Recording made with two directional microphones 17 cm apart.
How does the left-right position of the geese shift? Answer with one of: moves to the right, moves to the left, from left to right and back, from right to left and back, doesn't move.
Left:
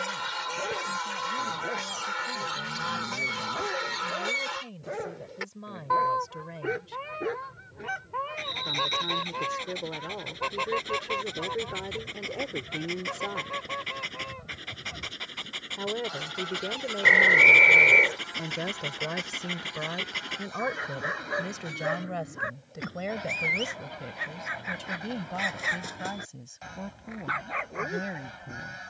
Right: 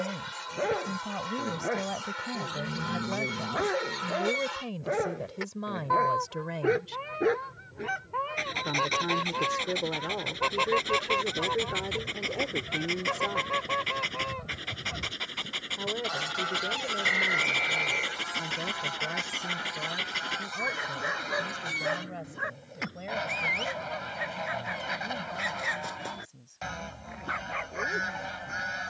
moves to the right.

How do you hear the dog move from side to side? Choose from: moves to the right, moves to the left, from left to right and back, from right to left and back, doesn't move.
moves to the left.